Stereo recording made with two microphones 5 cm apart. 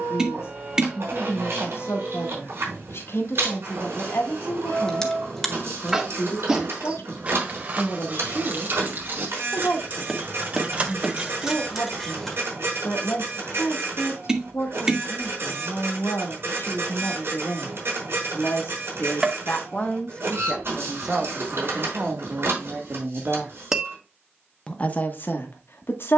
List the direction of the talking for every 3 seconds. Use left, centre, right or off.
left, left, left, left, left, left, left, right, left.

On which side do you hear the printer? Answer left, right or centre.
right.